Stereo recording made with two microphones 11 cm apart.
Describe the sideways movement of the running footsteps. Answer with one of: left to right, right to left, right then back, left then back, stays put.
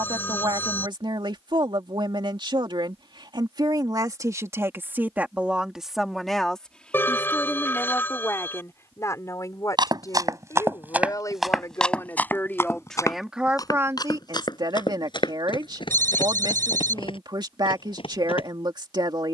right to left.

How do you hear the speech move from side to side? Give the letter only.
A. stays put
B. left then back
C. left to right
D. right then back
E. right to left
B.